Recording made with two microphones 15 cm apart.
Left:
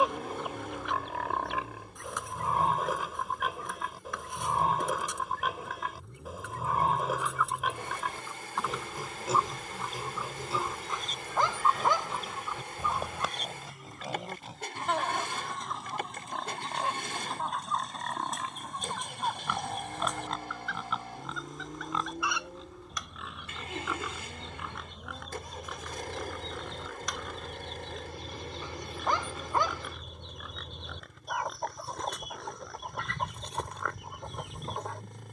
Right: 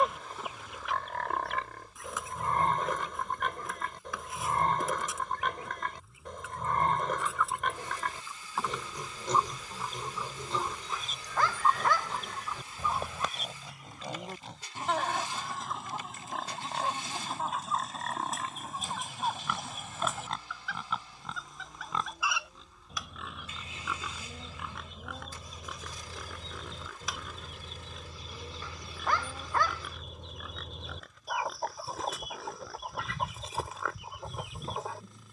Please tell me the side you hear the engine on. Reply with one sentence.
In this clip you hear the engine on the left.